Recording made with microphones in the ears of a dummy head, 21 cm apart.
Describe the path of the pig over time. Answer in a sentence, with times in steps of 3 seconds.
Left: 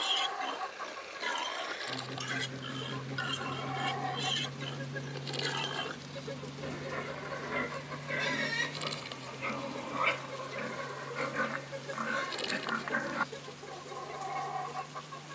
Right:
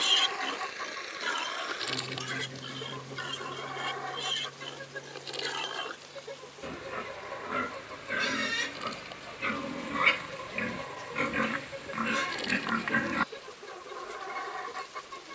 In this clip you hear the pig in the centre from 0 s and on the right from 9 s.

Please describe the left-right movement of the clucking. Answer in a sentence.
You can hear the clucking go left and come back.